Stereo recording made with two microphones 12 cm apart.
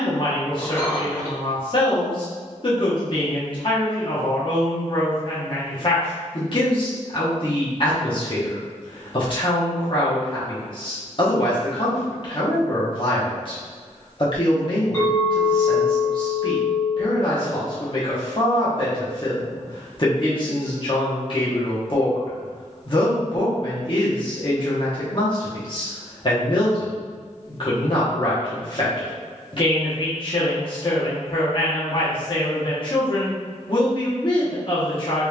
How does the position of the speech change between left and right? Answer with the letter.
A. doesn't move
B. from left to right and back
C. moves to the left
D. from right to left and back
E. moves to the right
A.